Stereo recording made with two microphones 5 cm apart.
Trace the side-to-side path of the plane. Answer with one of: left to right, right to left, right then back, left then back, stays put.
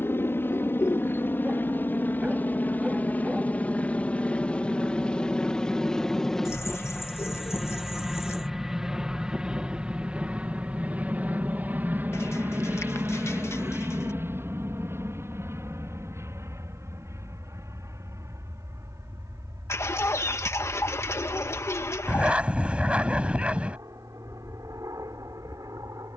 left to right.